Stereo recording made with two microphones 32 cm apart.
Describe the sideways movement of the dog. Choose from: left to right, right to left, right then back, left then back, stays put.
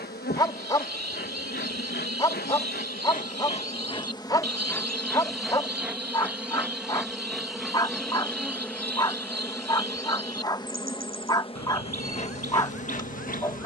stays put.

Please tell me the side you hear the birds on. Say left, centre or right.
right.